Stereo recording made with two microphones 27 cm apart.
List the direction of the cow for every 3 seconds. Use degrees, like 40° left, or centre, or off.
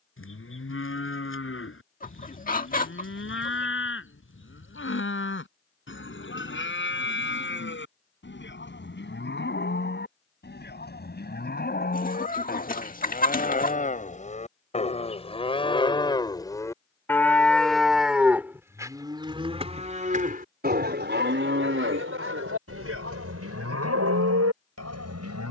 50° left, 50° left, 50° left, 40° left, 30° left, 10° left, 20° right, 60° right, 80° right.